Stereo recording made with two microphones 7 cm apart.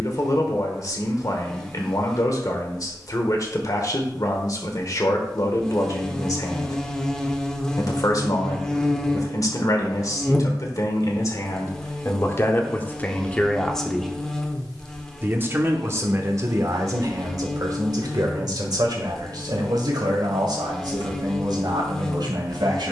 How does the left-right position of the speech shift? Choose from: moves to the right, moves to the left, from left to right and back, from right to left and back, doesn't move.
moves to the right.